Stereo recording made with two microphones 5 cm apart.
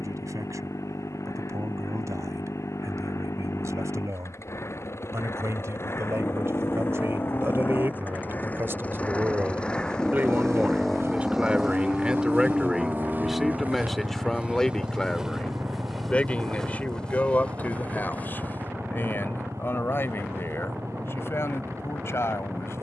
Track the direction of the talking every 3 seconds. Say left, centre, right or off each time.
right, right, right, right, centre, left, left, left.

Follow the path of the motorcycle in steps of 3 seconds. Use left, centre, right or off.
left, left, left, centre, right, right, right, right.